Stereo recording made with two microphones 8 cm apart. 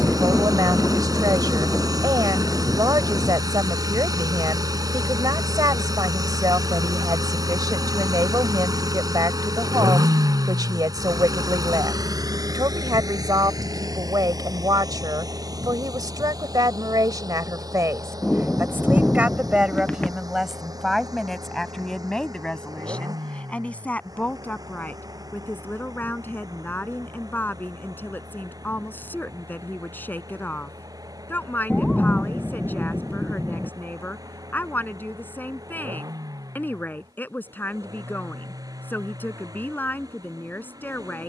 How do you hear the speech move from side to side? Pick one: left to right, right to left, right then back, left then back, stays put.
right to left.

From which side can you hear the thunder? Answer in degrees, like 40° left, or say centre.
10° left.